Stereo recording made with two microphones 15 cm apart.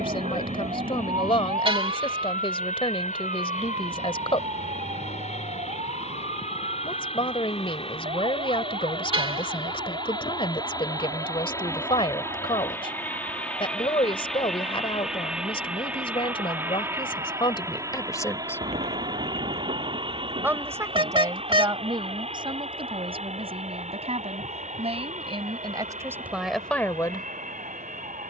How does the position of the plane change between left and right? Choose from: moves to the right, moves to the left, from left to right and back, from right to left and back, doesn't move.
moves to the right.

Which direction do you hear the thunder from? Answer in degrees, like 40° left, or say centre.
50° right.